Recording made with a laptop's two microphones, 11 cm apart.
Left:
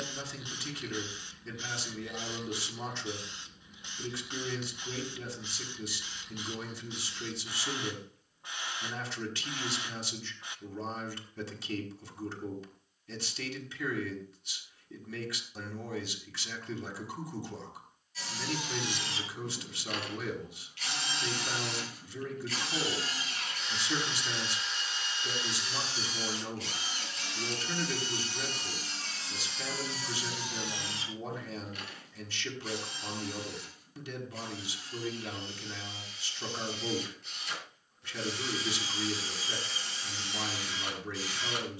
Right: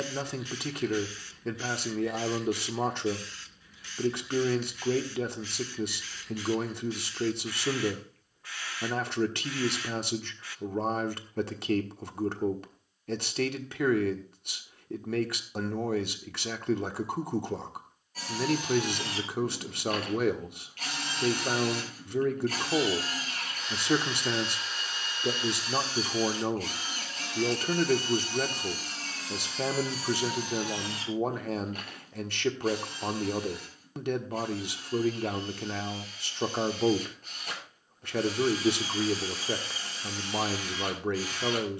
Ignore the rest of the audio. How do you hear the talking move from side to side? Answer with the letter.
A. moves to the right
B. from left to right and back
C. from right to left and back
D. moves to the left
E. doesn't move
E.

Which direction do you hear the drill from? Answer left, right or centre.
right.